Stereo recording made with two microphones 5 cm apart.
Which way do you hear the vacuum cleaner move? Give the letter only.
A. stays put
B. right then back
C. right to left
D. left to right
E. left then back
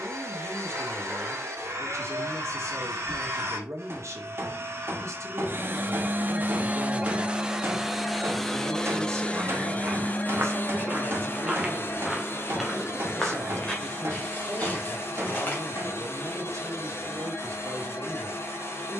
C.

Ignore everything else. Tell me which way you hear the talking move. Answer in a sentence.
You can hear the talking stay in one place.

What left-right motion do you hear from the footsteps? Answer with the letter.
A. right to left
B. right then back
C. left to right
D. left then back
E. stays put
A.